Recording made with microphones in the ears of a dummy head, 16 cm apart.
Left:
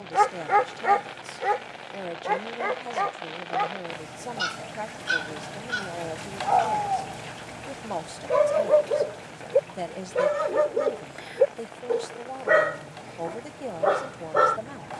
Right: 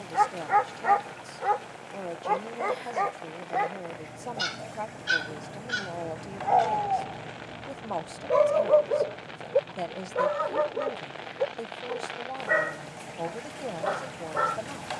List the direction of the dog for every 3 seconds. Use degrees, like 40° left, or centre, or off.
20° left, 10° right, centre, 30° left, 60° left.